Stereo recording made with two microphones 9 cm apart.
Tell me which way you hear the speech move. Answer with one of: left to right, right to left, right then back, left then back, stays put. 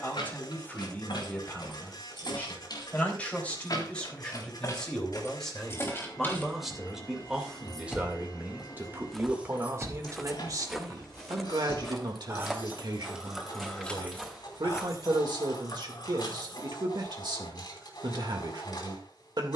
left to right.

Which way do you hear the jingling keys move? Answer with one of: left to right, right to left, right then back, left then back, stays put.
right then back.